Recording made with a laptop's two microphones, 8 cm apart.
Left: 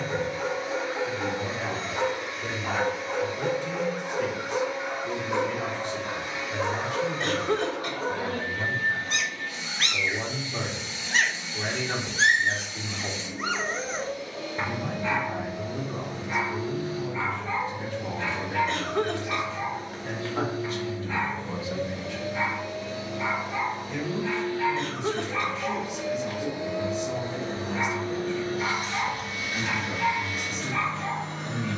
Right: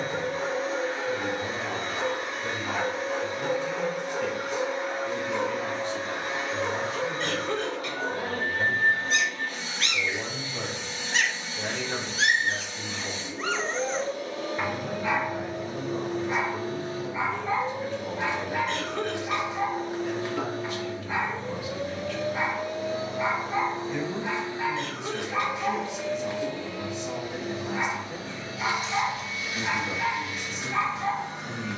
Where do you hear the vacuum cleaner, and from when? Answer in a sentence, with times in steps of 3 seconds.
You can hear the vacuum cleaner on the right from 0 s, in the centre from 24 s and on the left from 27 s.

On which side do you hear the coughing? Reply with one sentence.
You can hear the coughing on the left.